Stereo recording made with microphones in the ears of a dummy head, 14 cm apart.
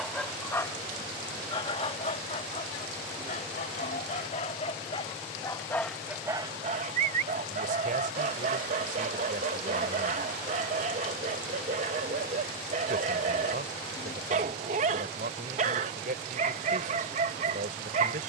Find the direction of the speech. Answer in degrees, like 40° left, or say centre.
50° right.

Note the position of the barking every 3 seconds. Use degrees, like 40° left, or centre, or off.
30° left, 40° left, 40° right, 40° right, 40° right, 40° right.